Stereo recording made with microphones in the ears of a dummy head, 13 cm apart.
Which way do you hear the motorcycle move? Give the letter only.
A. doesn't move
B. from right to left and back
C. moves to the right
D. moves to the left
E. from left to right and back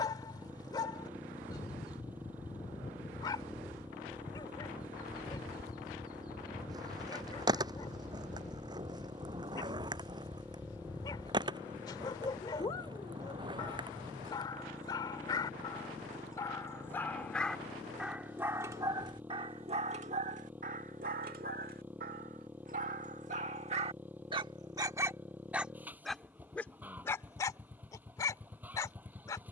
A.